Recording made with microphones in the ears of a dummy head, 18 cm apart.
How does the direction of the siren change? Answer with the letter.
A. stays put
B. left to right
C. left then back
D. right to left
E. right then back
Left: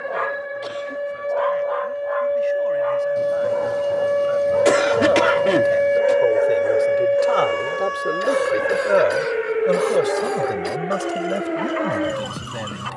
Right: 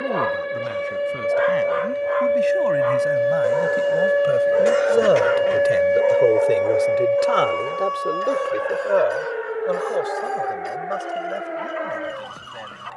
D.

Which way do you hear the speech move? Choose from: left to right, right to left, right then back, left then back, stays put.
right to left.